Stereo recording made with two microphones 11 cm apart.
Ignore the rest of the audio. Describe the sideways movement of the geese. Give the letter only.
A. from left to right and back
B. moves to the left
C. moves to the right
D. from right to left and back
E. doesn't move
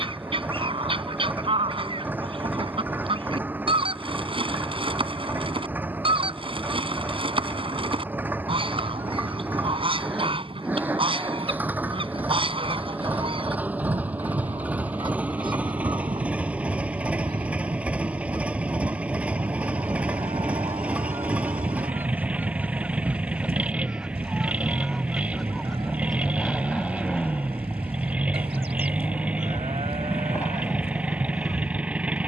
B.